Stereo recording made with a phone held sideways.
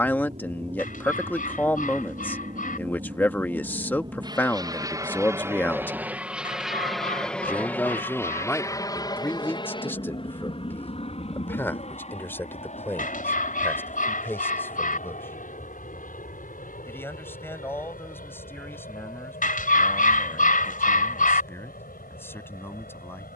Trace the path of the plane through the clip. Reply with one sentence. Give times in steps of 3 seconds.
You can hear the plane on the right from 0 s, in the centre from 6 s and on the left from 9 s.